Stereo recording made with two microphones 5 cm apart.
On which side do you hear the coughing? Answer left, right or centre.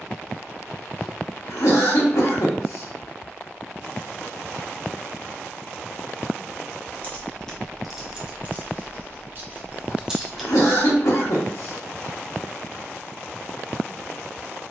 left.